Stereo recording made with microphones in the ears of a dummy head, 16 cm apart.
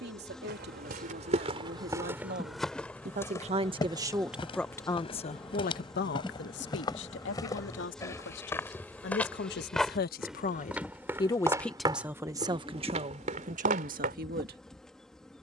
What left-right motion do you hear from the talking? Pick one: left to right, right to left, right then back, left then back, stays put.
left then back.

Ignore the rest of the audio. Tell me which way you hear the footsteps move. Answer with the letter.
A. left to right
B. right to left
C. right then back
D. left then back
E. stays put
D.